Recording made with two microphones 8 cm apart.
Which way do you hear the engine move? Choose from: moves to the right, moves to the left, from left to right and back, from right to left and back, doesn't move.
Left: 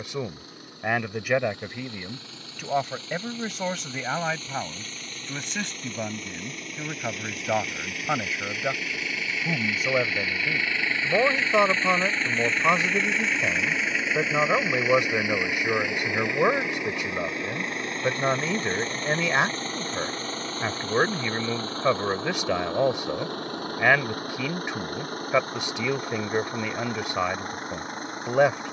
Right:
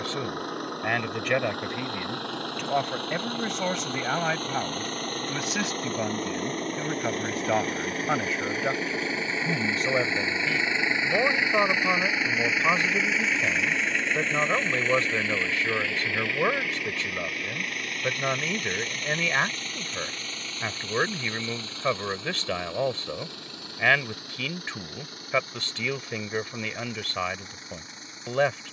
moves to the left.